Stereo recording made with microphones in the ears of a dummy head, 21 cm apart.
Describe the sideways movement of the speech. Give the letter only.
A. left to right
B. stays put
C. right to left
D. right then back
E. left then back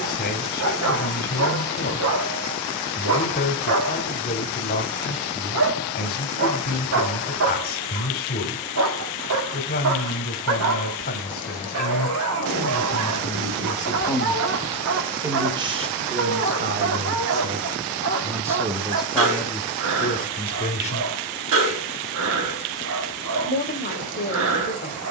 D.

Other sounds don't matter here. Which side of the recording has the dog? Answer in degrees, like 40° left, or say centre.
60° right.